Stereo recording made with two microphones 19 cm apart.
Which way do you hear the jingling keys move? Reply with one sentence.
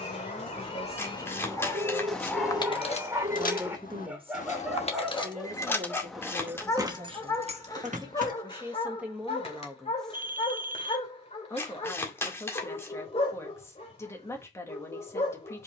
In this clip you hear the jingling keys move from right to left and back again.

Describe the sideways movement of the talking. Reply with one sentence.
In this clip you hear the talking go right and come back.